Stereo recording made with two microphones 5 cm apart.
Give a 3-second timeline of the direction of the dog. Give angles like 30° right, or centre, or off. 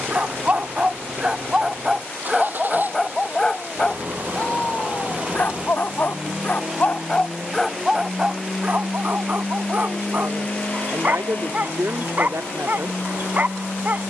10° right, 30° left, 10° left, 40° right, 40° right.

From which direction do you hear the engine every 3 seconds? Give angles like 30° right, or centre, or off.
50° right, 30° right, 10° right, 30° left, 50° left.